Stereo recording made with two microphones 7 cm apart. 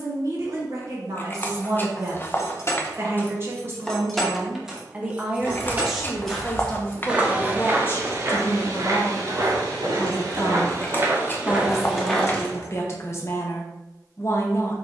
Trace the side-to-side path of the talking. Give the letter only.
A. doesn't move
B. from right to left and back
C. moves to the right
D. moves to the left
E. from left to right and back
D.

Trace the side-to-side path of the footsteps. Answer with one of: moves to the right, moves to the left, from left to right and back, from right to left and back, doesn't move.
from left to right and back.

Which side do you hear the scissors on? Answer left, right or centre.
left.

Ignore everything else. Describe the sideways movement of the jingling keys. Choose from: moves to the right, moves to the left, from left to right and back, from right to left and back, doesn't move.
from left to right and back.